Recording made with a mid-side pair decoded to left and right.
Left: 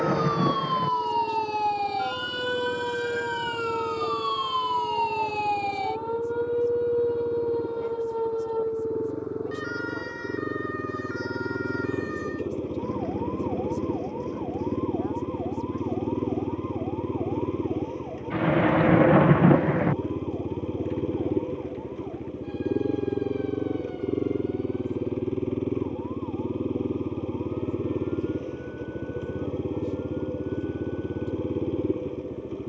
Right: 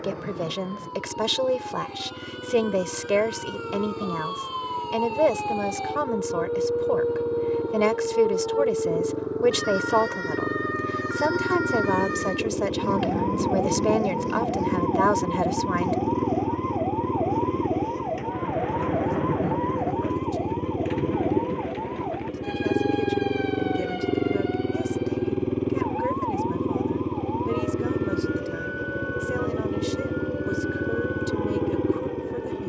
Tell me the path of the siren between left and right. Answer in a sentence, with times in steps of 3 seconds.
In this clip you hear the siren on the left from 0 s, in the centre from 6 s and on the right from 9 s.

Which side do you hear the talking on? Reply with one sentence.
You can hear the talking on the right.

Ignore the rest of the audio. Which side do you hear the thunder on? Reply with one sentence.
In this clip you hear the thunder on the left.